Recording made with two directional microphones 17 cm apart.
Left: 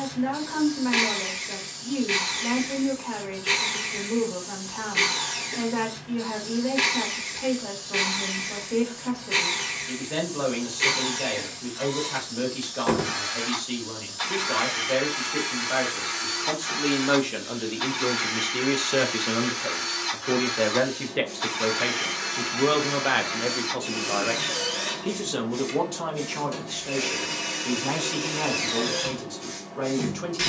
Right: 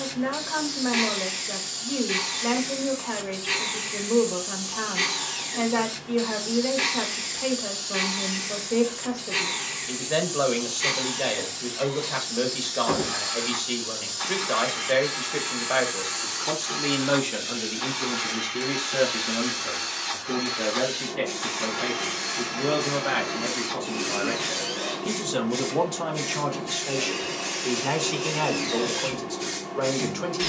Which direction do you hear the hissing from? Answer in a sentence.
You can hear the hissing on the right.